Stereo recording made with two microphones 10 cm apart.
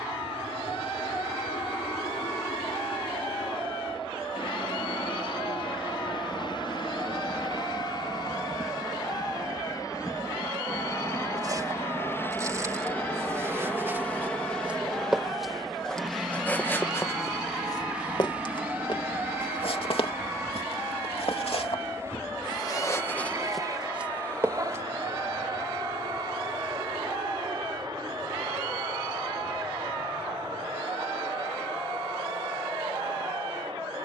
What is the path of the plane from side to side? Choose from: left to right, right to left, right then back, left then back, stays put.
left to right.